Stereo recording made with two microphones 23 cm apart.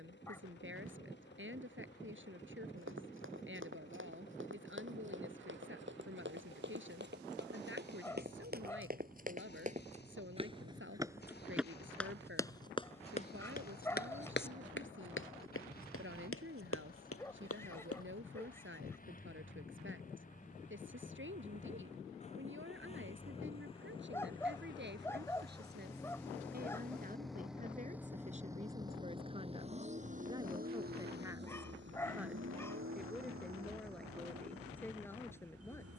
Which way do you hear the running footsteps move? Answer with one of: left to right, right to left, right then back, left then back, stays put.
right to left.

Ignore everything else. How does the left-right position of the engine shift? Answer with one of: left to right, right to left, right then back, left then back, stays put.
left to right.